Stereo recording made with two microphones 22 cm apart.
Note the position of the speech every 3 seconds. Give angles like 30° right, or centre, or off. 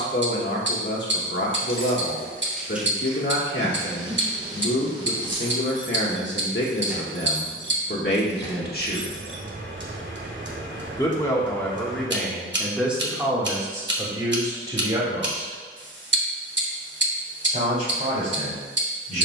60° left, 60° left, 50° left, 10° left, 10° right, 30° right, 40° right.